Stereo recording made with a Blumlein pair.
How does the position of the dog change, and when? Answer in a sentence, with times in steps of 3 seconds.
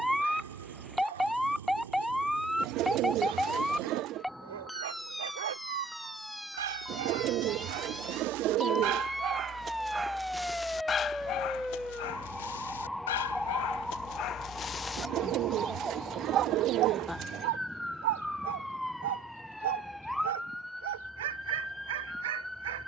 In this clip you hear the dog on the right from 0 s, in the centre from 9 s, on the left from 12 s and on the right from 15 s.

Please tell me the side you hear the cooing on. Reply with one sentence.
You can hear the cooing on the right.